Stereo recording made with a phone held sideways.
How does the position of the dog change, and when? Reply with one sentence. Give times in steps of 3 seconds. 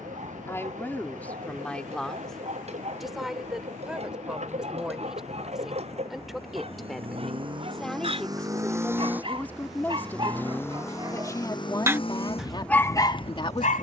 In this clip you hear the dog on the right from 0 s and on the left from 12 s.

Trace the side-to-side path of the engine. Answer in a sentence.
In this clip you hear the engine travel towards the left.